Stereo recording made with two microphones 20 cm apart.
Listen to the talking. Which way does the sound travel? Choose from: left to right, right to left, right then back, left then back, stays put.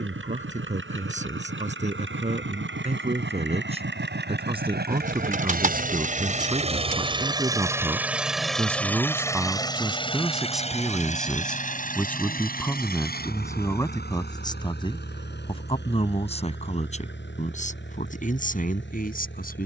right to left.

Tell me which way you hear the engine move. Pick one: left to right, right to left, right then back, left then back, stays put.
right to left.